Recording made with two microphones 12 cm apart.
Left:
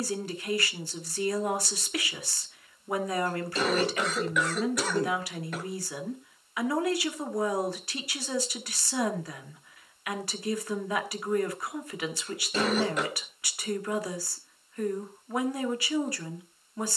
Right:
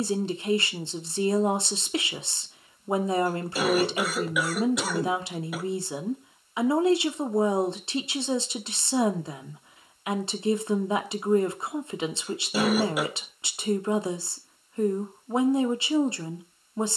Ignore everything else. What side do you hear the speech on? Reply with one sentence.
You can hear the speech on the right.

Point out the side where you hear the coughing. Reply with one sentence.
You can hear the coughing in the centre.